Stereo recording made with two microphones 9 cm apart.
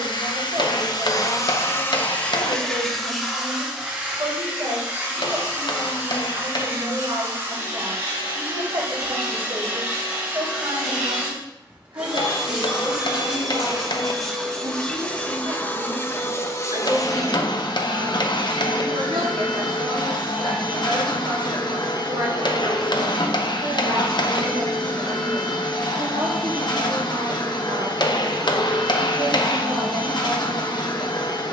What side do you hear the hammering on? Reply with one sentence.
You can hear the hammering on the left.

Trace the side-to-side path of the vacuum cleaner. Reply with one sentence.
You can hear the vacuum cleaner move from left to right and back again.